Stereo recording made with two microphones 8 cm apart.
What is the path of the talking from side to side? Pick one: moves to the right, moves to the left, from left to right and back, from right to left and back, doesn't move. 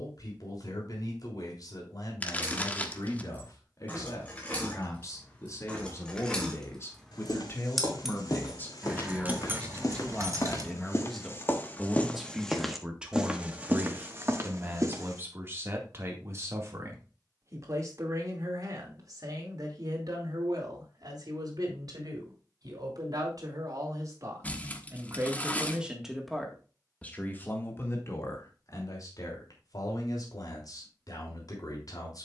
from left to right and back.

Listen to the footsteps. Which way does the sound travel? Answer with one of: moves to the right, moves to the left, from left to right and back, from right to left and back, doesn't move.
moves to the right.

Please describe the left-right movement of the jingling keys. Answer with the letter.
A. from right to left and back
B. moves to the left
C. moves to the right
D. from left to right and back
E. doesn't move
C.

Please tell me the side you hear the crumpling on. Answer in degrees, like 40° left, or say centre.
20° left.